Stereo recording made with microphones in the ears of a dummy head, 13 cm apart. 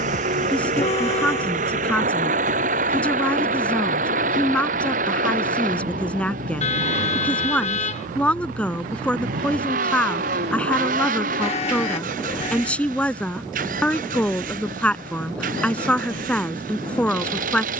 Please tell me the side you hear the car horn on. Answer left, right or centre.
left.